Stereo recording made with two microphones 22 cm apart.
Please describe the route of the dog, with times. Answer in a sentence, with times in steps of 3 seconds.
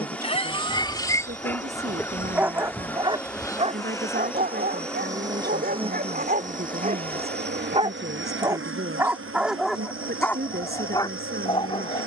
In this clip you hear the dog in the centre from 0 s, on the right from 3 s and in the centre from 9 s.